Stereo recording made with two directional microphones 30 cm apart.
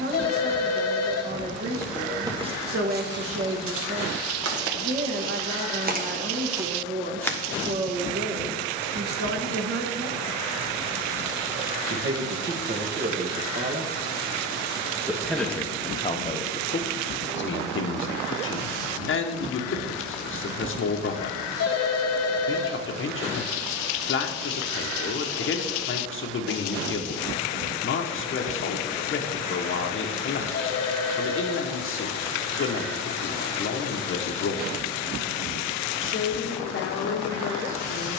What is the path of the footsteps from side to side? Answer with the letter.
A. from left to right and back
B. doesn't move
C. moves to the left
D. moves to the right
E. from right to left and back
A.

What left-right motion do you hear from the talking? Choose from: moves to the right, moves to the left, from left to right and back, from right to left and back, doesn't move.
moves to the left.